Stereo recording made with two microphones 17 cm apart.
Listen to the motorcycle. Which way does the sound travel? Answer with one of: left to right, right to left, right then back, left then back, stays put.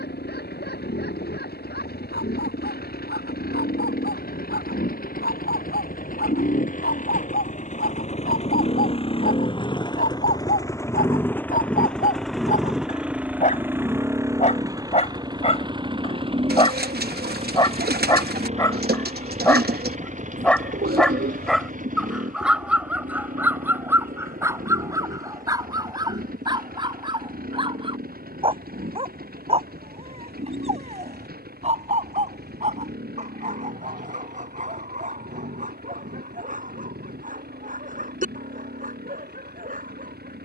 left to right.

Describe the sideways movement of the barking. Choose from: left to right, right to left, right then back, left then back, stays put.
left to right.